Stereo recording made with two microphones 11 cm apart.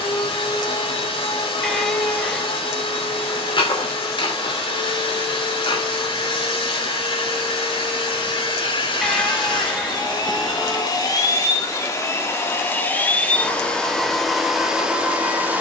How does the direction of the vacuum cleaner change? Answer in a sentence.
You can hear the vacuum cleaner travel towards the right.